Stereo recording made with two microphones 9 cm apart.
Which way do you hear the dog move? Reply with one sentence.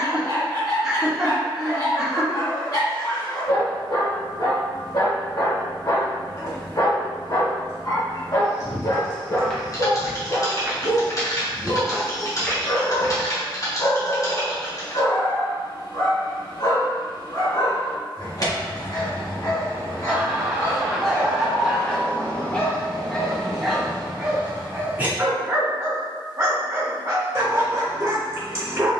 In this clip you hear the dog move to the right.